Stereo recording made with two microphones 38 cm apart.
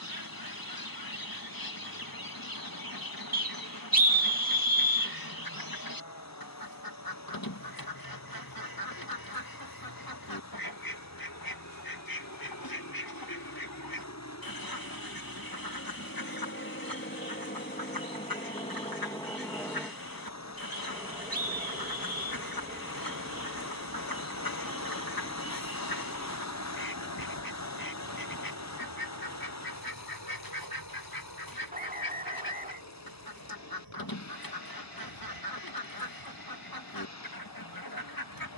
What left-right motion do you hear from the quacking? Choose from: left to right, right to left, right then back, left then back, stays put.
stays put.